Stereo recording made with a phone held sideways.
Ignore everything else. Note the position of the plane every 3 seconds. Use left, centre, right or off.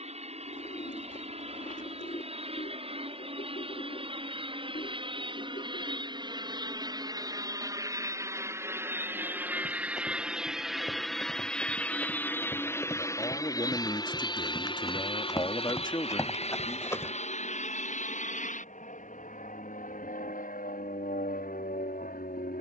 right, right, right, centre, left, left, left, left.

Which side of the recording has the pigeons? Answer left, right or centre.
left.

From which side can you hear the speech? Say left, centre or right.
left.